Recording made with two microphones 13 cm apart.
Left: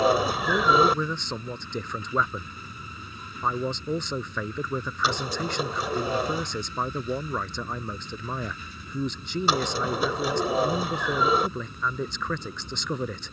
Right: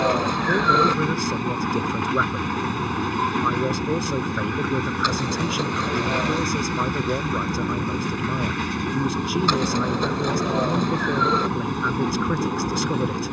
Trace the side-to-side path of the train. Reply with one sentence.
You can hear the train stay in one place.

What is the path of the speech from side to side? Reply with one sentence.
You can hear the speech stay put.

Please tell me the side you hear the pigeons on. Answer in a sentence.
You can hear the pigeons in the centre.